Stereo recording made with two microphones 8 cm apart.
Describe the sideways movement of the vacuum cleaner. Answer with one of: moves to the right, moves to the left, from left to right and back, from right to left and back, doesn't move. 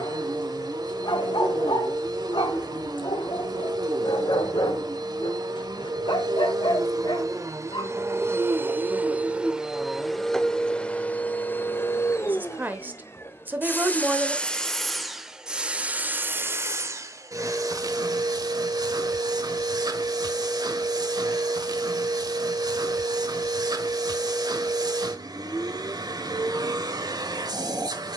from right to left and back.